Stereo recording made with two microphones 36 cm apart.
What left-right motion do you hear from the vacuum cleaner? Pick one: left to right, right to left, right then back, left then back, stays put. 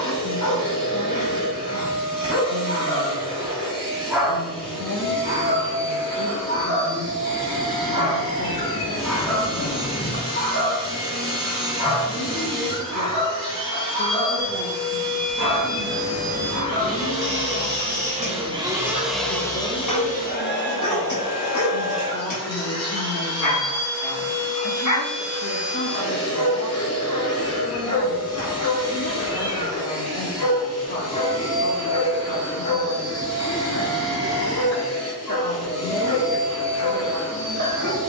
right to left.